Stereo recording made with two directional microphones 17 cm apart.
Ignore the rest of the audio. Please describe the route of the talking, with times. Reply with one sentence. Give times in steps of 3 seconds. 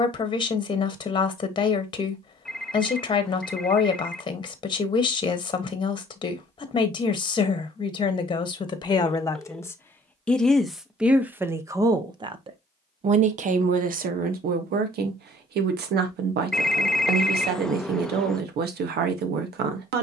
You can hear the talking on the left from 0 s, in the centre from 9 s and on the right from 12 s.